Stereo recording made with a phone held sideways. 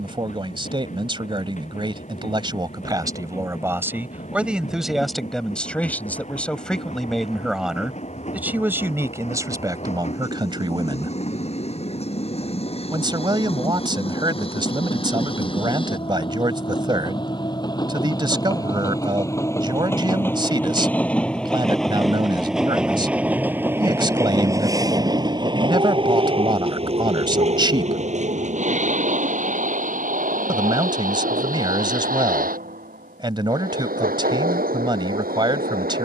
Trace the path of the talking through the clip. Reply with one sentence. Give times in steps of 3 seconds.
In this clip you hear the talking on the right from 0 s, in the centre from 3 s and on the right from 9 s.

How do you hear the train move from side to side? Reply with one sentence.
In this clip you hear the train go from the left side to the right.